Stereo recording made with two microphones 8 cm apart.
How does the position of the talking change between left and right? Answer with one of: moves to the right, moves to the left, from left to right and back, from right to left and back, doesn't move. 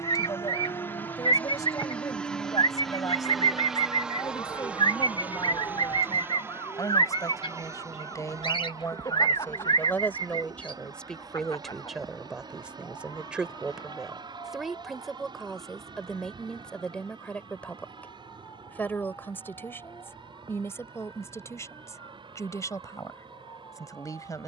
from left to right and back.